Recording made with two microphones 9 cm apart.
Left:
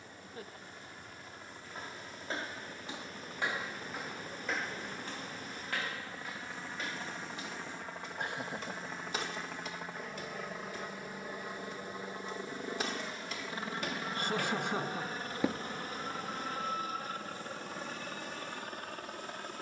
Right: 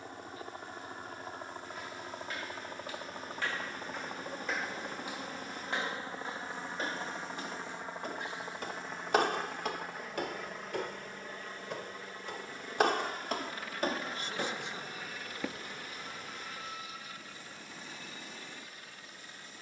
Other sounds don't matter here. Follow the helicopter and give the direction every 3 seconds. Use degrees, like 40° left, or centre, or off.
50° right, 30° right, 20° right, centre, 20° left, 40° left, 50° left.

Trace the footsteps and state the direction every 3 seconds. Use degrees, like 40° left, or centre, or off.
30° left, centre, 50° right, 70° right, 50° right, 20° left, off.